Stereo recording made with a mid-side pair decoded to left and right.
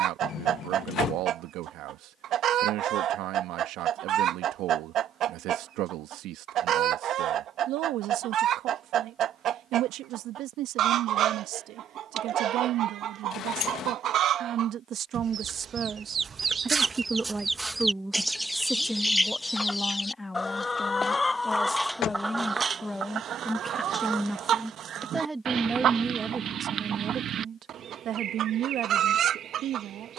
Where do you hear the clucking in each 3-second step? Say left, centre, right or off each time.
right, right, right, right, right, right, centre, right, right, right.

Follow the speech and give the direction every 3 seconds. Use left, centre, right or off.
right, right, right, right, right, right, centre, centre, right, right.